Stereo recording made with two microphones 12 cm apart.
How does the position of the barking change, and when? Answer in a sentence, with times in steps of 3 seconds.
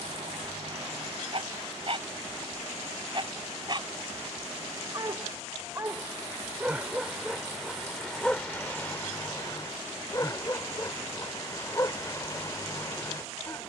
In this clip you hear the barking on the right from 0 s, in the centre from 6 s and on the left from 9 s.